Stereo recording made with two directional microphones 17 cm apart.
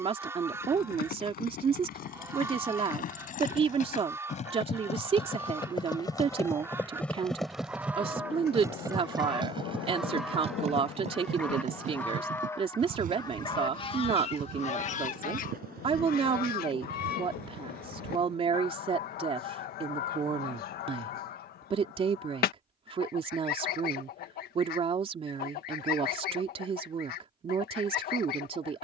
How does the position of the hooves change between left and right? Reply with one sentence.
In this clip you hear the hooves travel towards the right.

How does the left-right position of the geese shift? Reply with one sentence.
You can hear the geese travel towards the left.